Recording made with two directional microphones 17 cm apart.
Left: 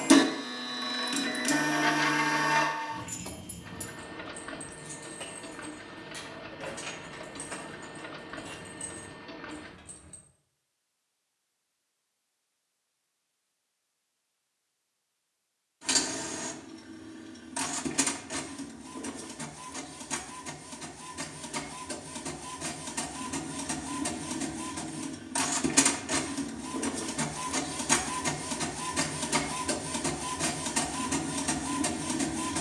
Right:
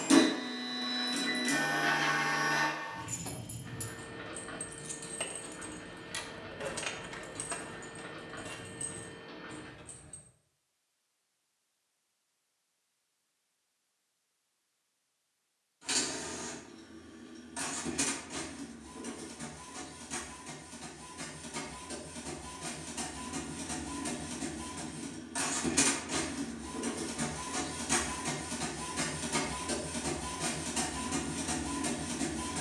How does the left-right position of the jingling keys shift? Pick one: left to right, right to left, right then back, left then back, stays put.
right then back.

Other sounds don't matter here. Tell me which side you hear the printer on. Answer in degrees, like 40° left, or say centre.
40° left.